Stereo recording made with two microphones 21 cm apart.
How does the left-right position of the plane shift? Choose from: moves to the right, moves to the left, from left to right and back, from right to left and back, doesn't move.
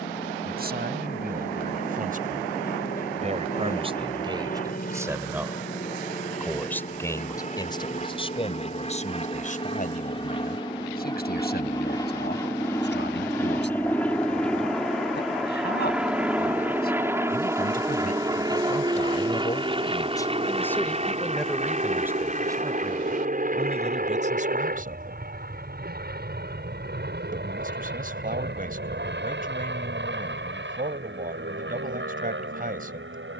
moves to the right.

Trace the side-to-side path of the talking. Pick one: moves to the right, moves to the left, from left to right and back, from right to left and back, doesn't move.
from right to left and back.